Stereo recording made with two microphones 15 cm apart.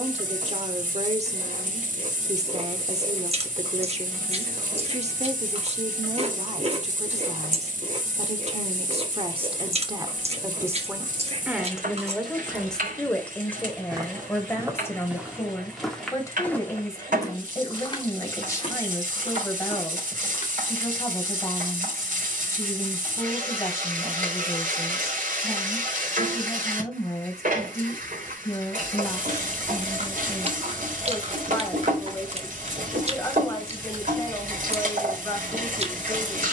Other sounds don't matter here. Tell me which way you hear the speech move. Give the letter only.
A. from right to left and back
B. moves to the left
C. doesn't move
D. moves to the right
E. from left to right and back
B.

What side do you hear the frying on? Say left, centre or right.
right.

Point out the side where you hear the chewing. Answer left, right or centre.
right.